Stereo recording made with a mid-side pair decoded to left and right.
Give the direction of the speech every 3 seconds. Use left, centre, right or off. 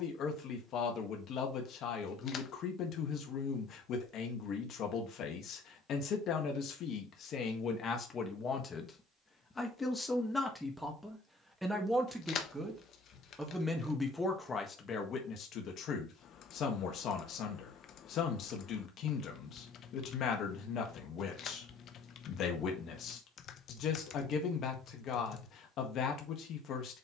left, left, left, centre, centre, left, left, left, left.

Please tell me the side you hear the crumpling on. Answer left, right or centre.
left.